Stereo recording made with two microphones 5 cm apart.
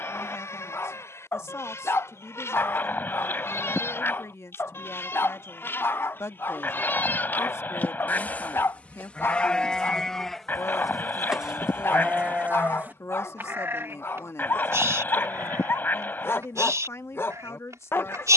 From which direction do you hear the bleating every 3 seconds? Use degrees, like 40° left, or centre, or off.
60° left, 50° left, 40° left, centre, 40° right, 70° right.